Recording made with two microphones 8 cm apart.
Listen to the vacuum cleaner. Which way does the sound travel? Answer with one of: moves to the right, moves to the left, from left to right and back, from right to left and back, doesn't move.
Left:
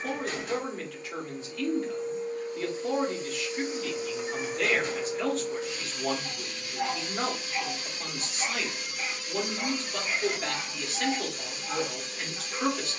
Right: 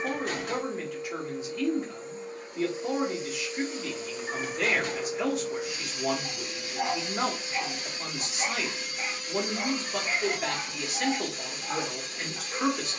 from right to left and back.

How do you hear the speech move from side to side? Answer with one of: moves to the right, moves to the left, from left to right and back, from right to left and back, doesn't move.
doesn't move.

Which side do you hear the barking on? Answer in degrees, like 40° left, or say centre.
30° right.